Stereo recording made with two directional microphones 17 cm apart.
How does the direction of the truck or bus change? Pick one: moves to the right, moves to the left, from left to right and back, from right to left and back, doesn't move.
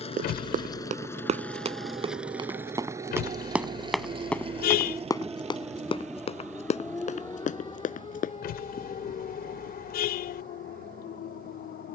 moves to the right.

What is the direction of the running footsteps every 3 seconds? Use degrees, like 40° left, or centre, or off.
40° right, 10° left, 50° left, off.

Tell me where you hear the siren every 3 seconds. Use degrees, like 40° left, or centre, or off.
50° right, 30° right, 20° left, 60° left.